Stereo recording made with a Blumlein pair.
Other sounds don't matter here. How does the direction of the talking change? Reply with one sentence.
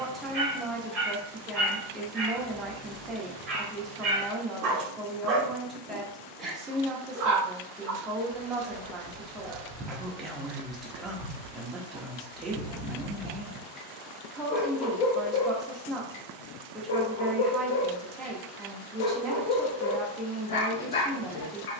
In this clip you hear the talking stay in one place.